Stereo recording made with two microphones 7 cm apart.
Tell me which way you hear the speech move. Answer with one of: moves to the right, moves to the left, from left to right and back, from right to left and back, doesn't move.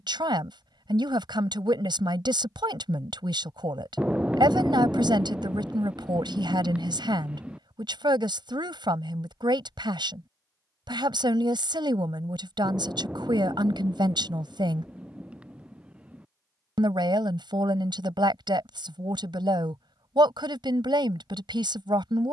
doesn't move.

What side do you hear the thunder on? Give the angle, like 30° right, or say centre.
10° right.